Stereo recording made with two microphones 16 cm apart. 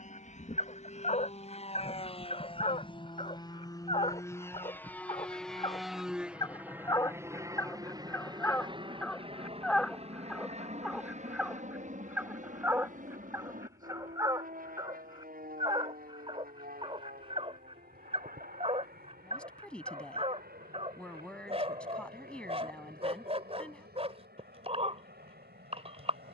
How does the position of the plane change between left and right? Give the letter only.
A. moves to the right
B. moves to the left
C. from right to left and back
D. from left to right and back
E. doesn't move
A.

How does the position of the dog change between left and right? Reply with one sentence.
In this clip you hear the dog move to the right.